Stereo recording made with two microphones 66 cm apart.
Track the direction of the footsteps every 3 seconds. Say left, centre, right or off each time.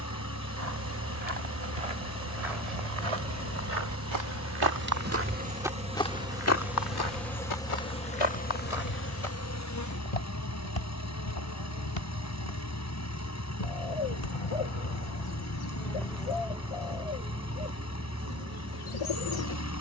right, right, left, left, left, off, off.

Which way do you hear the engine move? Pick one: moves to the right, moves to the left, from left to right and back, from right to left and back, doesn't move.
doesn't move.